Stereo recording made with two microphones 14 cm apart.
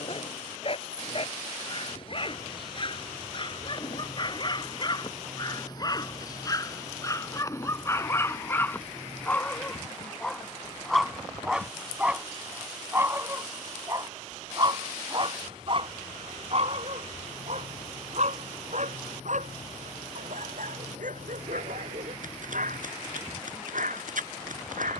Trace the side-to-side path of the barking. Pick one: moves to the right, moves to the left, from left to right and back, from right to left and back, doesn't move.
moves to the right.